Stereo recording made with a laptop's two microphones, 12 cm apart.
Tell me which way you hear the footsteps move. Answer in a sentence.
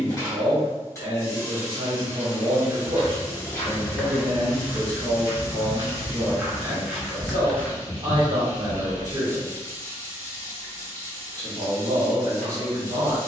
You can hear the footsteps go right and come back.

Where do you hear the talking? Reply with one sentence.
You can hear the talking on the right.